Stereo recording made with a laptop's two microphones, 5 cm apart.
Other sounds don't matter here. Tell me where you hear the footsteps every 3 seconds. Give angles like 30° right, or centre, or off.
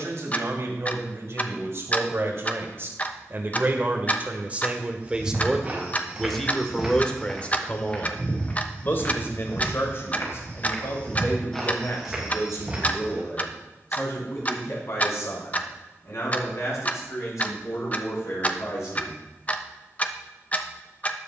off, 30° right, 10° left, 30° left, 20° right, off, off.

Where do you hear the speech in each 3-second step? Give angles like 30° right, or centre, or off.
60° right, 30° right, 20° left, 50° left, 70° left, 70° left, 70° left.